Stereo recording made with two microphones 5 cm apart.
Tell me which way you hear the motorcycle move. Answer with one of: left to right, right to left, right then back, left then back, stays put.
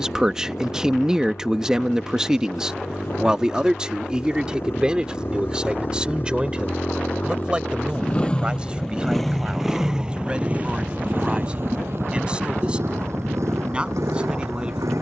left to right.